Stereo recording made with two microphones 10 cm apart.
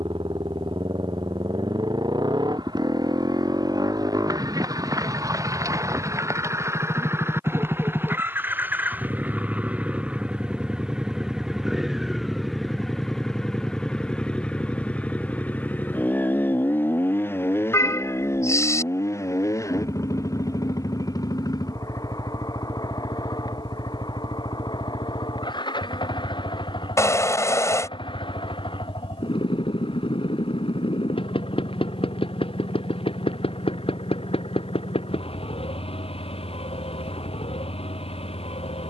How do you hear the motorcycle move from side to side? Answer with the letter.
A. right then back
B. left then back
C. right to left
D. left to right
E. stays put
C.